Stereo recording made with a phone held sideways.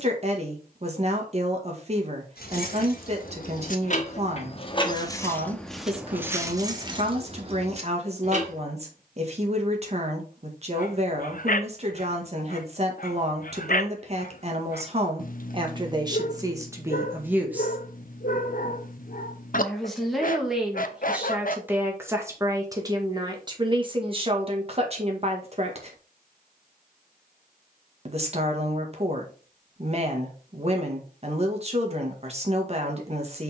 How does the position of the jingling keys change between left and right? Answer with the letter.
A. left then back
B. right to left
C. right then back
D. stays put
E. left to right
E.